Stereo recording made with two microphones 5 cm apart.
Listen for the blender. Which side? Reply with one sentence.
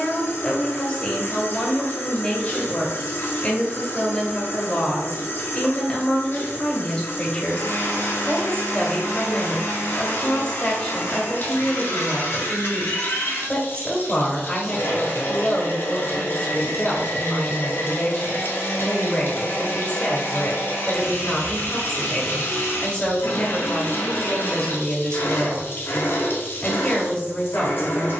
You can hear the blender on the left.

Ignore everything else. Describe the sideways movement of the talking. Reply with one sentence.
You can hear the talking stay in one place.